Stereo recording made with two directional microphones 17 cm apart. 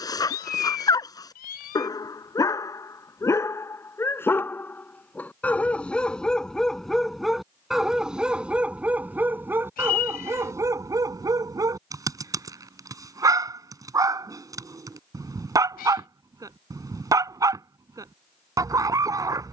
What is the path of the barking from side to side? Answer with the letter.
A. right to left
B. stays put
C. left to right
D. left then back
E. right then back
C.